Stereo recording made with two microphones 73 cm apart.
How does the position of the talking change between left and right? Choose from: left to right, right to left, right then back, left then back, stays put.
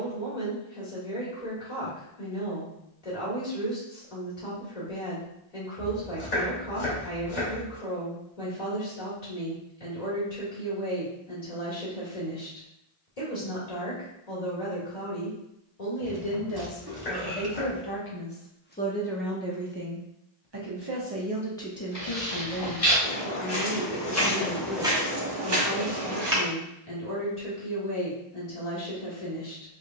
right then back.